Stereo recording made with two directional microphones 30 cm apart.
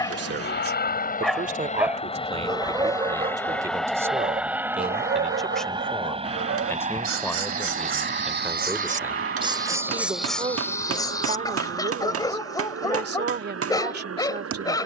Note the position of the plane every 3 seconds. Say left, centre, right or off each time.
left, centre, right, right, right.